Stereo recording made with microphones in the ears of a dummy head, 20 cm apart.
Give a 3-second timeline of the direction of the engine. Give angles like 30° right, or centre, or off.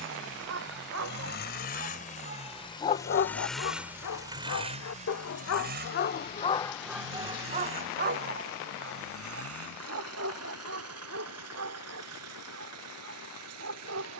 40° left, 20° right, 60° right, 70° right, 80° right.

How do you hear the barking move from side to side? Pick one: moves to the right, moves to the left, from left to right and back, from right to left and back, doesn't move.
from right to left and back.